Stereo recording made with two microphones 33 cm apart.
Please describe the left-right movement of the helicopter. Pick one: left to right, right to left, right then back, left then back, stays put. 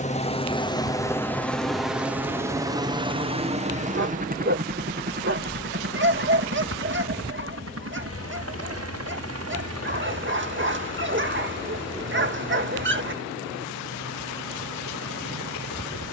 left to right.